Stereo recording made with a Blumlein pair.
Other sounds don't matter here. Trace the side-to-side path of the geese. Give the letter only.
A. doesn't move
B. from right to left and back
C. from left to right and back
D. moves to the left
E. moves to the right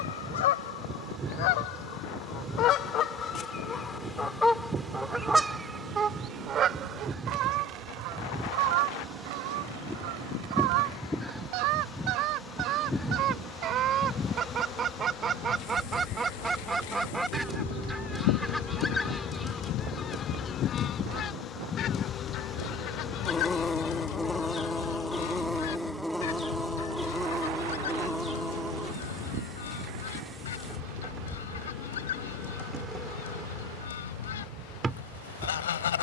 C.